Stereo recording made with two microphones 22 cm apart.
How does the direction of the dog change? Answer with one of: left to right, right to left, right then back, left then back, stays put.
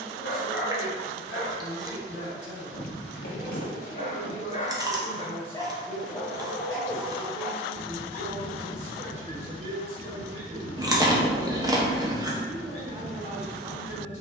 left to right.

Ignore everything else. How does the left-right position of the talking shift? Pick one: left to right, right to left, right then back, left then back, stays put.
stays put.